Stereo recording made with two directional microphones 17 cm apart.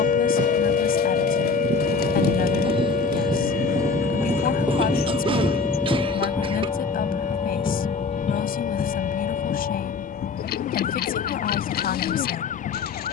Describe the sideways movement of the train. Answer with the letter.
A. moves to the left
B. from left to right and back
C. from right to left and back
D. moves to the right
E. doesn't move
A.